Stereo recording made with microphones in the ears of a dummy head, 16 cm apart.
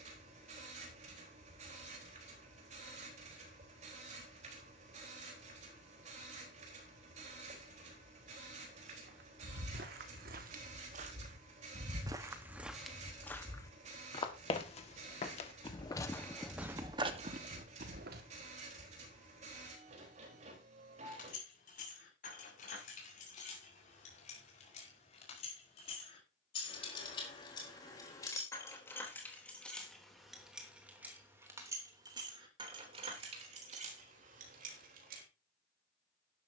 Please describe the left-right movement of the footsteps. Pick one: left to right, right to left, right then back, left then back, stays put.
left then back.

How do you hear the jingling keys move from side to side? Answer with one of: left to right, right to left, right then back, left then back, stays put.
left to right.